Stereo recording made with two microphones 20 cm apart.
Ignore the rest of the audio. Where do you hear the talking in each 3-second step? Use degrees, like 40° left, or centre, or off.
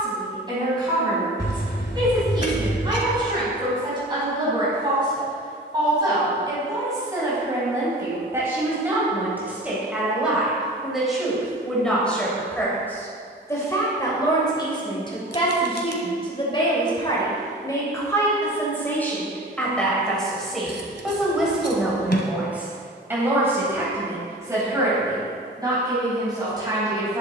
20° right, 20° right, 20° right, centre, 10° left, 20° left, 10° left, 10° right, 20° right.